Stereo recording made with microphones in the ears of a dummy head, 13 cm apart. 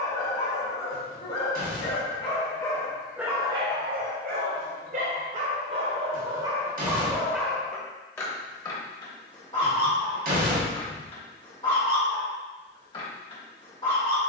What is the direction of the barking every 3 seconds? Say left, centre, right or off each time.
left, right, centre, left, left.